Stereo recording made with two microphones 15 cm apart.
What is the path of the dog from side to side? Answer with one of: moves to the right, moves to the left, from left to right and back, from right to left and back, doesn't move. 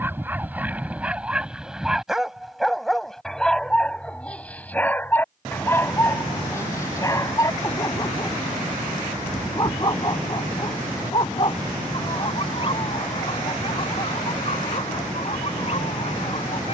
moves to the left.